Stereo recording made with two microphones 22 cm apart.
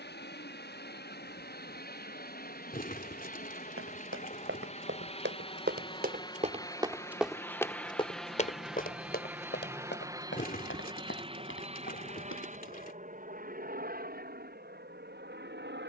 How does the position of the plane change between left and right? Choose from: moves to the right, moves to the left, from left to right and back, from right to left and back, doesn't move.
moves to the right.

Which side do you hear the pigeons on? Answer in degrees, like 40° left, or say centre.
40° left.